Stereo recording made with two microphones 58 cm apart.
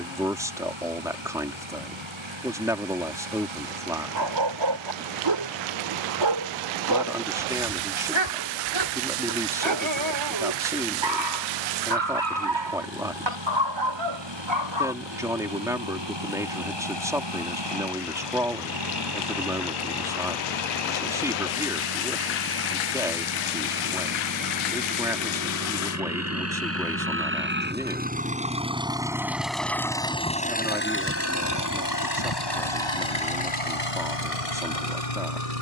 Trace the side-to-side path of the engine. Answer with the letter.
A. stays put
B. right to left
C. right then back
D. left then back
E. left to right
B.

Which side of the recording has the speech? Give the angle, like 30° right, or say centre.
10° right.